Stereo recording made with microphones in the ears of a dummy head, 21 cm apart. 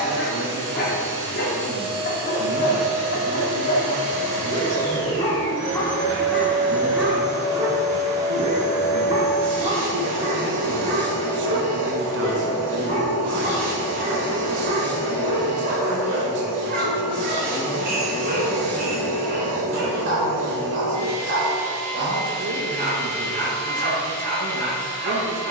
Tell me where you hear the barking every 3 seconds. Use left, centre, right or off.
left, left, centre, right, right, right, right, right, right.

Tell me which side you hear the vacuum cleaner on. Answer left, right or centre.
right.